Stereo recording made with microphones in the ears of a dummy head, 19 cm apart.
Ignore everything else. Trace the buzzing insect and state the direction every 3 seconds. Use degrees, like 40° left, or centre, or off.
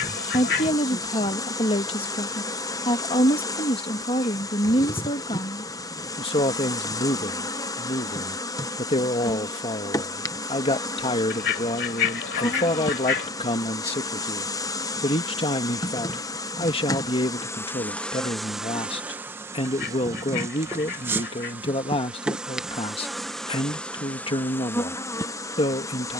20° left, 20° left, 20° left, 20° left, 20° left, 10° left, 10° right, centre, 10° left.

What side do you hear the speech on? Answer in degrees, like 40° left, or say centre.
30° left.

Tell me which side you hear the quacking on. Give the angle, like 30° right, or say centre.
60° left.